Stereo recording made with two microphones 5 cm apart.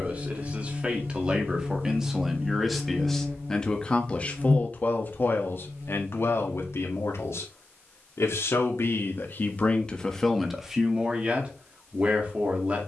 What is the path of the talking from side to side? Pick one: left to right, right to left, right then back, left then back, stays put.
left then back.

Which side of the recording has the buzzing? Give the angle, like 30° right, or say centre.
50° right.